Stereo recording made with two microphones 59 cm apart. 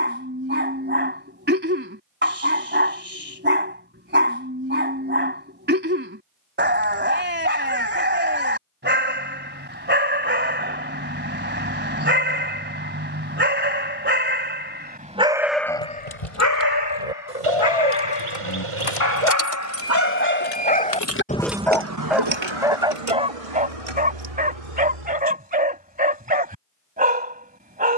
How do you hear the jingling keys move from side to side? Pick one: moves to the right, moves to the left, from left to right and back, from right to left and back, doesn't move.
moves to the right.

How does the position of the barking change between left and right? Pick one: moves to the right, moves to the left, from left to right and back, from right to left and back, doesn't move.
from right to left and back.